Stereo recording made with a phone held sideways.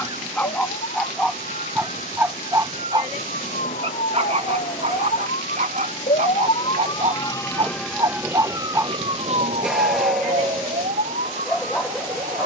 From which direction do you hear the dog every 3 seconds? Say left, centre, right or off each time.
centre, right, right, centre.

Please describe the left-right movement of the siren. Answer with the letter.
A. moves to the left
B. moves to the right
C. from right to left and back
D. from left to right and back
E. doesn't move
B.